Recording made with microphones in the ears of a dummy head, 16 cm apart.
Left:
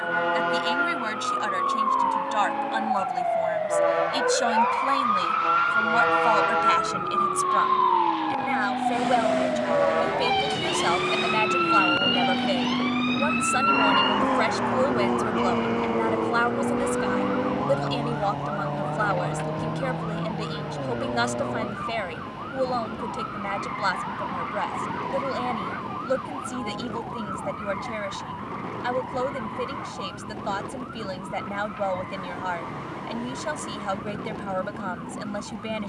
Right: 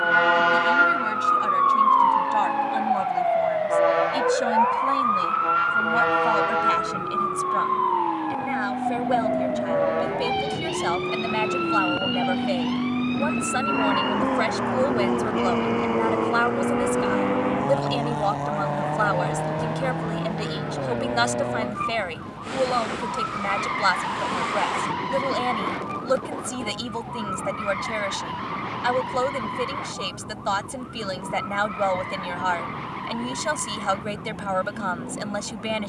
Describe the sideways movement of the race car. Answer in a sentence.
You can hear the race car go from the left side to the right.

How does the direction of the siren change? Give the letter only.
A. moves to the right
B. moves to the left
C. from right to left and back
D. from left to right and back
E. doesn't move
B.